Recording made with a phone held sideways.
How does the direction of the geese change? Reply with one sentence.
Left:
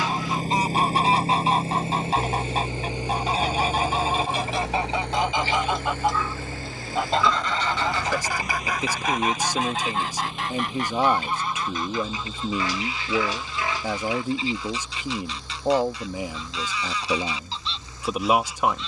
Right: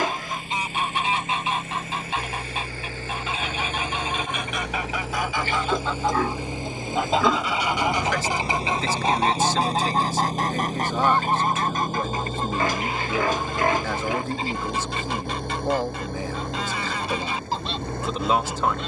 In this clip you hear the geese move from left to right.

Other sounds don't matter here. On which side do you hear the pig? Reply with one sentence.
In this clip you hear the pig on the right.